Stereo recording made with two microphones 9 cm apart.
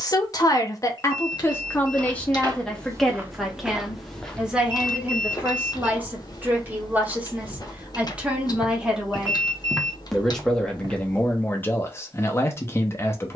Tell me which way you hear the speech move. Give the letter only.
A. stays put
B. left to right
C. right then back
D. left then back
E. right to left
C.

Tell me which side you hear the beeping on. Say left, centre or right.
left.